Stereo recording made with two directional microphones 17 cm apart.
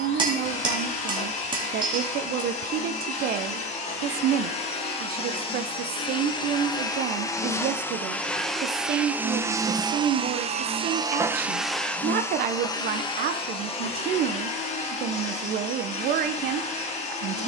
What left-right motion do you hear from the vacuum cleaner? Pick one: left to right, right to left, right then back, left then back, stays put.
right then back.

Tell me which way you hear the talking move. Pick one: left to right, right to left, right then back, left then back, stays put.
stays put.